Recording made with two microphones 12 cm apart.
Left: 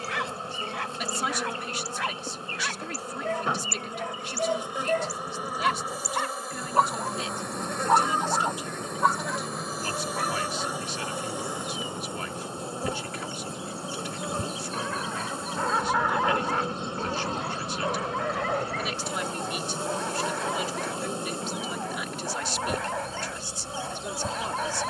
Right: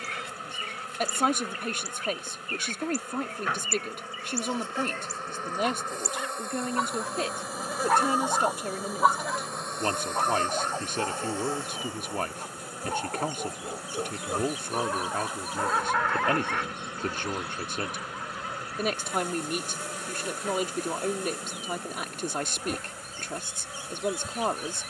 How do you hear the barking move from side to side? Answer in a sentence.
In this clip you hear the barking go right and come back.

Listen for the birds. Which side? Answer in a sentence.
You can hear the birds on the left.